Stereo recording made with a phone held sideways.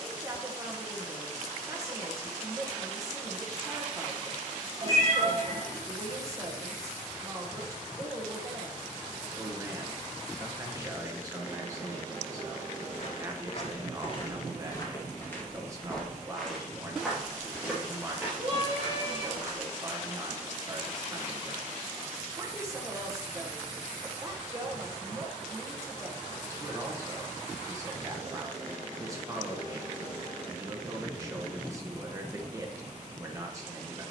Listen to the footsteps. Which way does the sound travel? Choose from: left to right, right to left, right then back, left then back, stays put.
left to right.